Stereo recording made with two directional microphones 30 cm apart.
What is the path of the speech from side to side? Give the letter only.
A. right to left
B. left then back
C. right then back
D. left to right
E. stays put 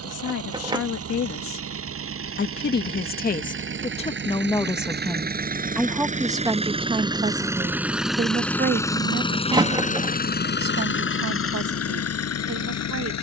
D.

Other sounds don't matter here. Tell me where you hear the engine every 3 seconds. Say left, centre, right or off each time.
right, right, centre, left, left.